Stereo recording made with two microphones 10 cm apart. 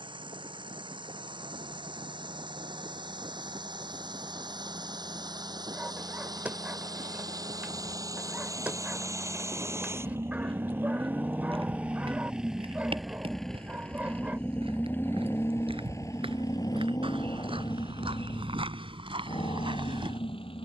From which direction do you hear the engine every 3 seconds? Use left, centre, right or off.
right, right, right, right, centre, left, left.